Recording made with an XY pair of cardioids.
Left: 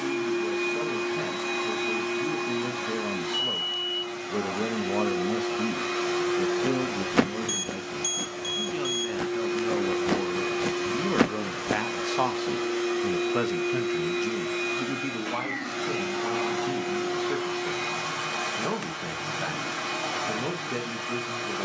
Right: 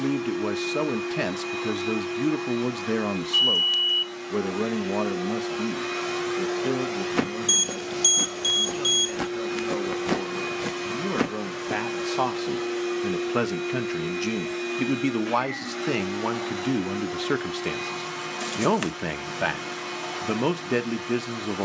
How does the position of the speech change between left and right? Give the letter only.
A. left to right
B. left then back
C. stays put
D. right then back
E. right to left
B.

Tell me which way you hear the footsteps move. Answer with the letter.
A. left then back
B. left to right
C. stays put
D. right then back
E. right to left
D.